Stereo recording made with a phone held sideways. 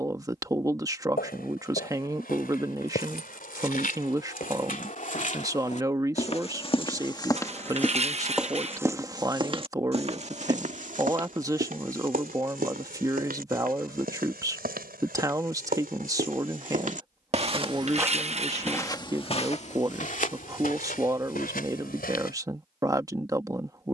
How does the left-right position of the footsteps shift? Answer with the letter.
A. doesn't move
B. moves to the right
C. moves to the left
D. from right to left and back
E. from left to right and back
E.